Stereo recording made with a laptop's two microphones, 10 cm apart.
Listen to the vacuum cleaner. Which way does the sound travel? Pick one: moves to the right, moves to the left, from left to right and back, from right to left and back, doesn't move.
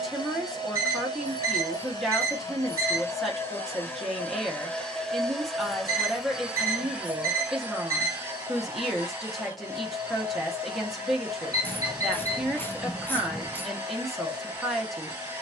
moves to the right.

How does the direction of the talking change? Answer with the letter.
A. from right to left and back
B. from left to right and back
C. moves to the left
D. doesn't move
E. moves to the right
D.